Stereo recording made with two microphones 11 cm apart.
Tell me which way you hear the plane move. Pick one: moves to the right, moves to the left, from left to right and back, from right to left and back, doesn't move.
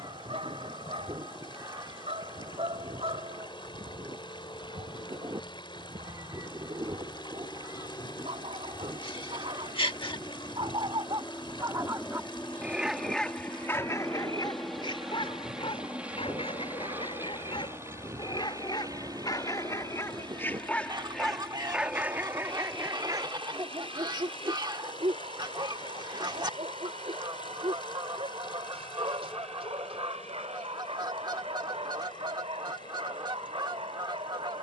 moves to the right.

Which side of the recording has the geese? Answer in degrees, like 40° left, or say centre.
40° right.